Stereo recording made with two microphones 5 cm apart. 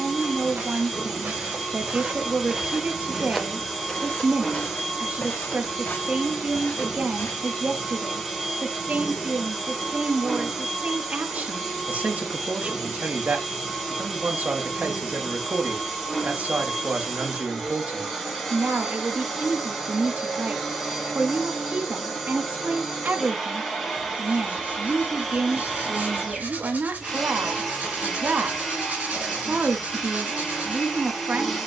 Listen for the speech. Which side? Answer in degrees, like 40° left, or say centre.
40° right.